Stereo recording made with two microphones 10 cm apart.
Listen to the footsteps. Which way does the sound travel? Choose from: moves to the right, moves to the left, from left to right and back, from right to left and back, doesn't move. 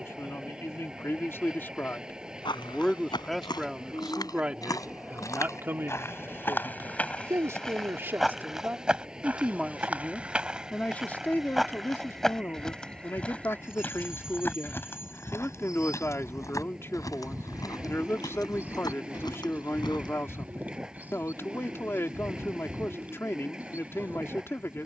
from left to right and back.